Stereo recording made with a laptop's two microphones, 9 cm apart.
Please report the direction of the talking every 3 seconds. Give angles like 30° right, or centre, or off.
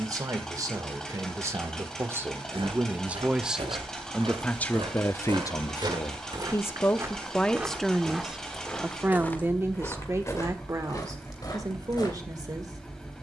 30° right, 20° left, 10° left, 30° right, 40° right.